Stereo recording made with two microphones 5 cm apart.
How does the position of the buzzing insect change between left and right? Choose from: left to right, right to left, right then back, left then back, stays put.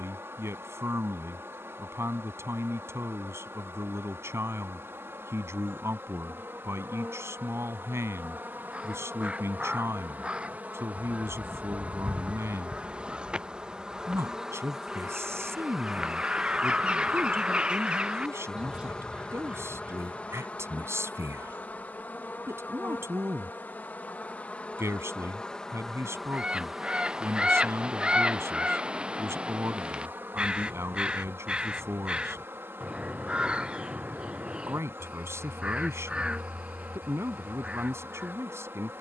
left then back.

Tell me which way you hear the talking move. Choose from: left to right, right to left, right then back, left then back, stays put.
stays put.